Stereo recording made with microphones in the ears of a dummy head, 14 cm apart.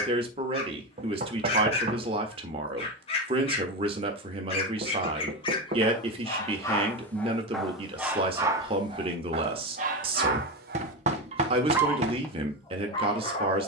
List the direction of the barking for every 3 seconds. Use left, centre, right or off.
left, left, centre, right, left.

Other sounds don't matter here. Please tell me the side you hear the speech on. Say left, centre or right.
right.